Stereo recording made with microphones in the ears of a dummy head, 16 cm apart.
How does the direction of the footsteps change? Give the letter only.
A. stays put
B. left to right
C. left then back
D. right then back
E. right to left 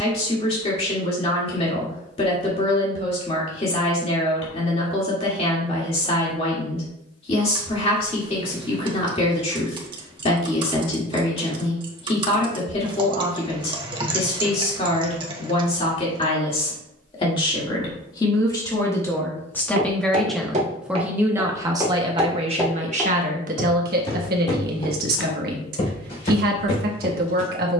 E.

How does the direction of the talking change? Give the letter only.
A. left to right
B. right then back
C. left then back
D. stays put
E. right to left
A.